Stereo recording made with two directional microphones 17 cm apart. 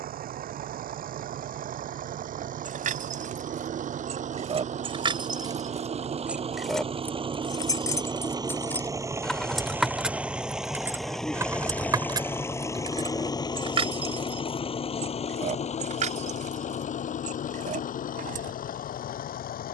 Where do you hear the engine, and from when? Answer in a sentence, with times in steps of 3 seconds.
You can hear the engine on the right from 0 s, in the centre from 9 s and on the left from 12 s.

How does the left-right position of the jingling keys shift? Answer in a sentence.
You can hear the jingling keys move from right to left and back again.